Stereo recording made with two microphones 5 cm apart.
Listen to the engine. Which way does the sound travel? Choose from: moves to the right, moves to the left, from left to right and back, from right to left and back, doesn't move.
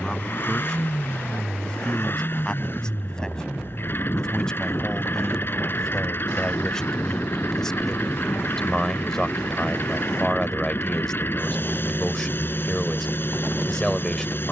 doesn't move.